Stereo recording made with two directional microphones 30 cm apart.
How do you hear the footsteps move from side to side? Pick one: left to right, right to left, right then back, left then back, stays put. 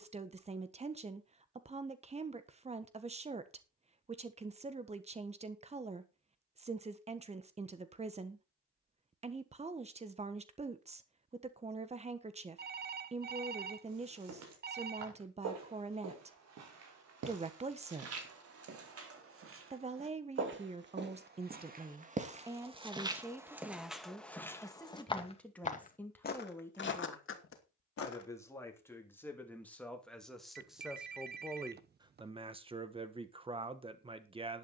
right to left.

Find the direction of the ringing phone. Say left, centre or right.
right.